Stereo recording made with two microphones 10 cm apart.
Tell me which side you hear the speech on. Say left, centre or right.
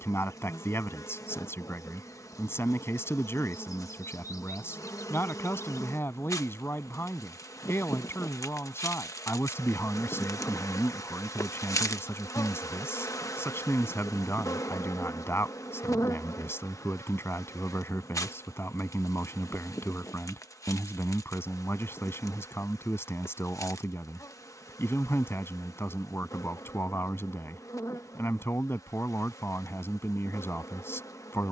left.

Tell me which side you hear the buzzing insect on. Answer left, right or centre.
left.